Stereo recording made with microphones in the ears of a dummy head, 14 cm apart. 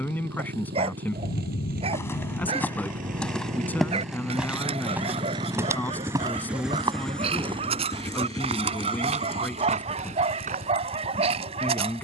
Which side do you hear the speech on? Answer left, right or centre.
centre.